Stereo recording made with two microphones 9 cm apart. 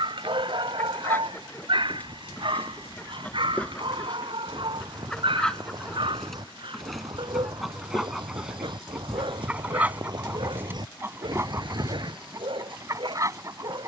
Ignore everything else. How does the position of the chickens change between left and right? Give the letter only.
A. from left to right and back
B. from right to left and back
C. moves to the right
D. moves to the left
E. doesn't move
C.